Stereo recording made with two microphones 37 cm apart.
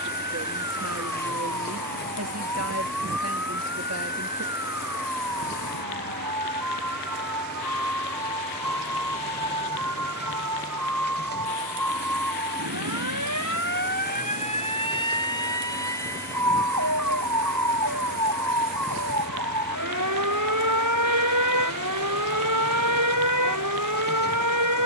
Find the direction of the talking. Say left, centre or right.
right.